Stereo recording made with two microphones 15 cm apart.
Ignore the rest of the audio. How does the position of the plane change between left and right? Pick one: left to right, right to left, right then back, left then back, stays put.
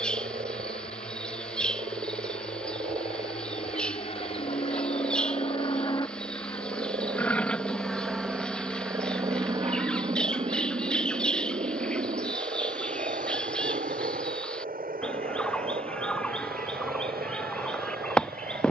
left to right.